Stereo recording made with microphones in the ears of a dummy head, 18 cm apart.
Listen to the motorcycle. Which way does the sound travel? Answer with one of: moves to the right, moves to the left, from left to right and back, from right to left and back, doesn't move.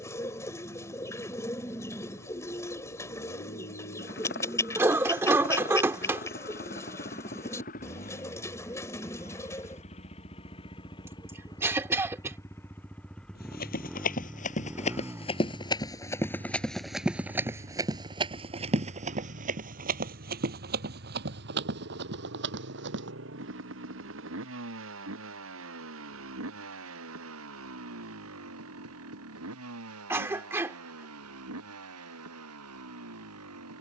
moves to the right.